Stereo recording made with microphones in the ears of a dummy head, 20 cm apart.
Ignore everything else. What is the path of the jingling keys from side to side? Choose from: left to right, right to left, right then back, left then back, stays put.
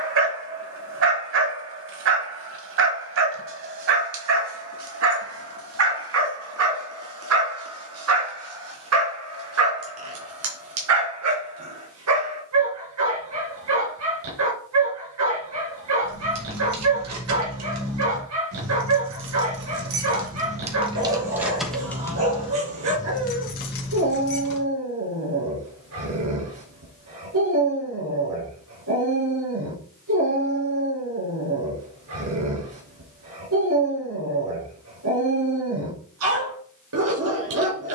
right to left.